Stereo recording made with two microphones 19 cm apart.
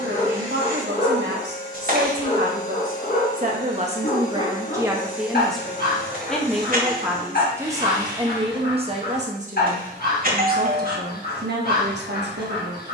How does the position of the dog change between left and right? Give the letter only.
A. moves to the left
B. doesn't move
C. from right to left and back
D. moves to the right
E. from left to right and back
B.